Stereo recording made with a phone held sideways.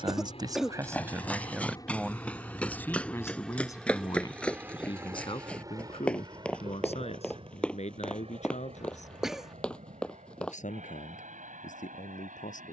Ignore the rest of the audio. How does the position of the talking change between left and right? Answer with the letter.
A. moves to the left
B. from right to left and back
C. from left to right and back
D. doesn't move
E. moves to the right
A.